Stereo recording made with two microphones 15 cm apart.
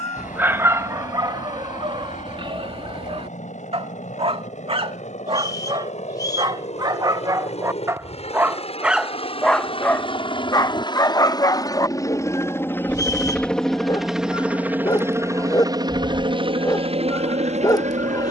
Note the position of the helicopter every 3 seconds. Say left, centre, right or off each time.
left, left, left, left, centre, right.